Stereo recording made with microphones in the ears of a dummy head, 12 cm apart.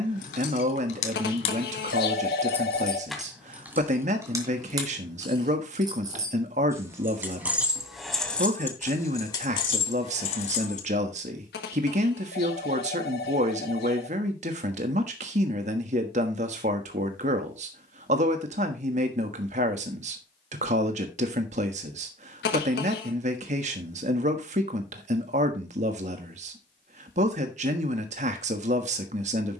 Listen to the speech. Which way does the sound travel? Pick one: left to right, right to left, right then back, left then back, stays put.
stays put.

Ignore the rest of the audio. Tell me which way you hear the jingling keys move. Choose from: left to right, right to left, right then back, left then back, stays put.
right then back.